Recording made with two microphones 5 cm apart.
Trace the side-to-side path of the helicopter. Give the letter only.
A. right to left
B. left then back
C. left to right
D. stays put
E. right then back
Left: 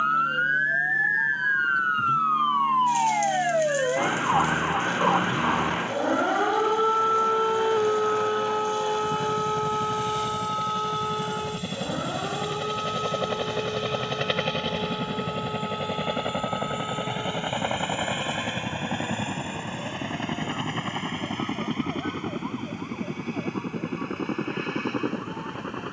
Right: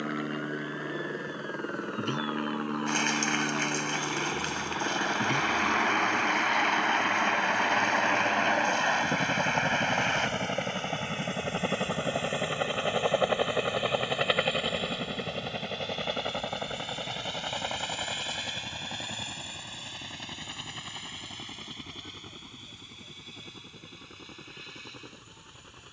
A.